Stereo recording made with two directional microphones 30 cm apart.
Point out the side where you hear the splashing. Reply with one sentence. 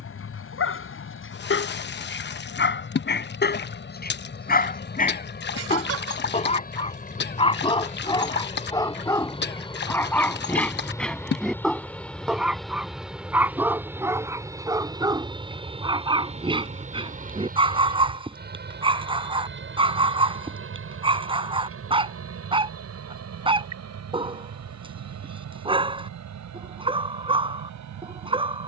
In this clip you hear the splashing on the left.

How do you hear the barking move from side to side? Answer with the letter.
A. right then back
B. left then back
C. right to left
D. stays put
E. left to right
E.